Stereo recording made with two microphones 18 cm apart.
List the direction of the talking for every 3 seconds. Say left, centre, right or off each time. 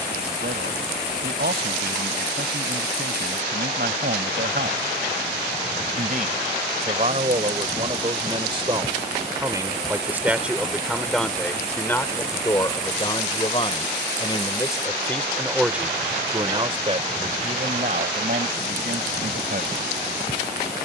right, right, right, centre, left, right, right.